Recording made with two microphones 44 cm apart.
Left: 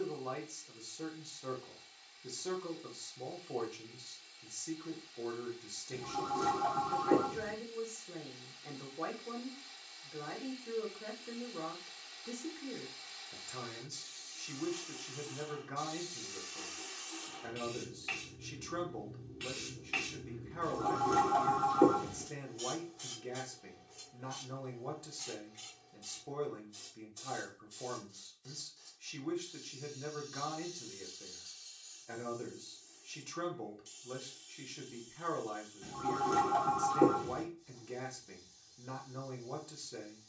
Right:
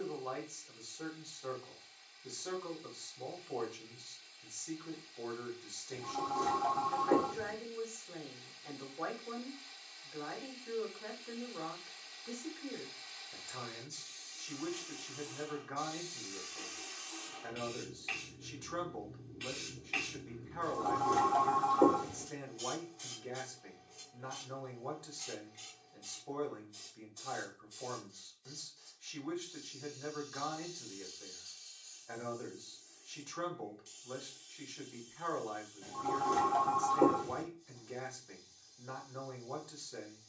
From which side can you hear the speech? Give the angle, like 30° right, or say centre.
40° left.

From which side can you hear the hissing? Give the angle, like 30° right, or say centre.
30° left.